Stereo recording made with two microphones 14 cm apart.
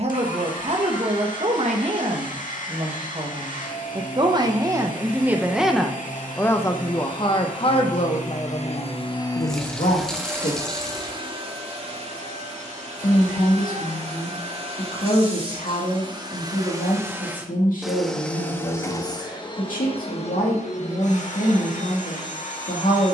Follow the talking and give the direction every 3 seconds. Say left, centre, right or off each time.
right, right, left, left, left, left, left, left.